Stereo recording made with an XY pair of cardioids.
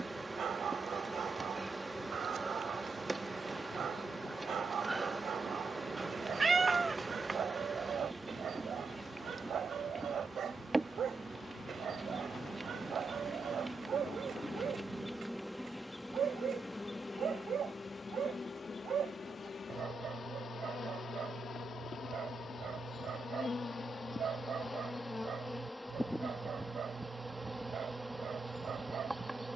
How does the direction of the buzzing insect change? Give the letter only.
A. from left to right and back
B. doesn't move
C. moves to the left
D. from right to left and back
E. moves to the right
D.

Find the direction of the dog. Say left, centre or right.
right.